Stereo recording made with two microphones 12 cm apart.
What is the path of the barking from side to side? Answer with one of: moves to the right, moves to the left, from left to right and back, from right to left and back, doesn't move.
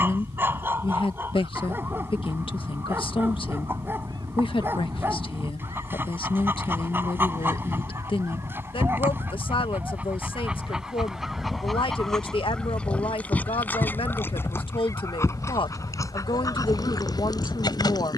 moves to the left.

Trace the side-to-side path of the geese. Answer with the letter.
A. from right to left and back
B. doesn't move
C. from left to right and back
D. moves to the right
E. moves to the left
E.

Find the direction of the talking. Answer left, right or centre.
left.